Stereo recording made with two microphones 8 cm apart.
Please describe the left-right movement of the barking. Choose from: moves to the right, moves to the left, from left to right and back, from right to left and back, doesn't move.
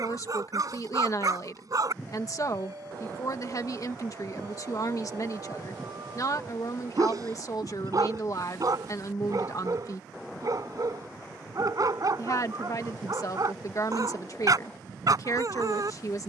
doesn't move.